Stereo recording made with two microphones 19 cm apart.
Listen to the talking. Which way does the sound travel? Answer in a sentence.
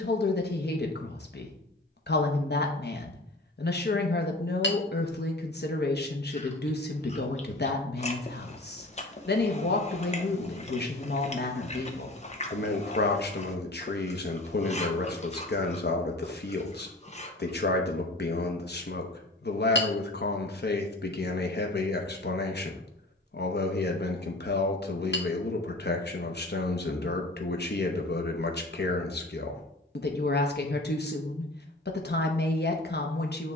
In this clip you hear the talking stay put.